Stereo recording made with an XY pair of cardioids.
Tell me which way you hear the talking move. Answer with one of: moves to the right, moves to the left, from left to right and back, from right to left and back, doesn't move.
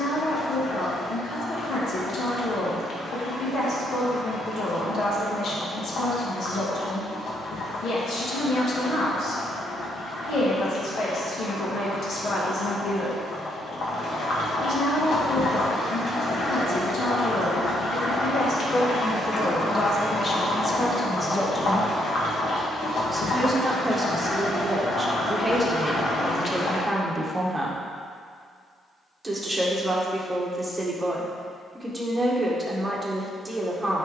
moves to the right.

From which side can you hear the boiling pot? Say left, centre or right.
left.